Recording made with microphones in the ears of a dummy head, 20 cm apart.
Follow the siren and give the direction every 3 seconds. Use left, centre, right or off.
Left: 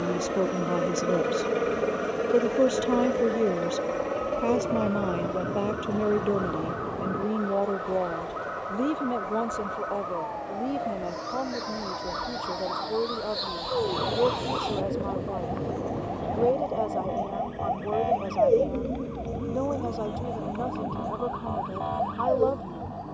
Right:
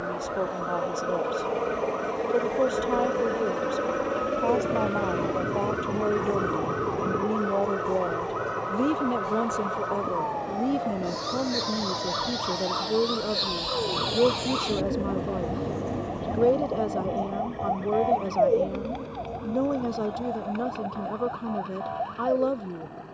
right, right, right, right, right, centre, left, left.